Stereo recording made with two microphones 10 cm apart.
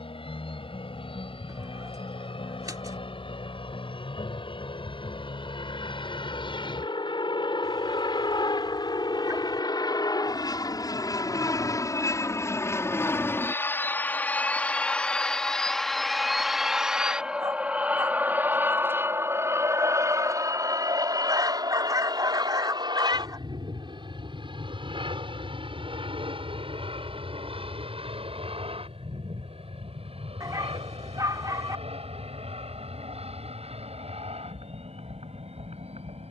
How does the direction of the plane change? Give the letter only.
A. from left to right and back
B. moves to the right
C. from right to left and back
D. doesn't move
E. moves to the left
B.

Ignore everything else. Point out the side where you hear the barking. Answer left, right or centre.
right.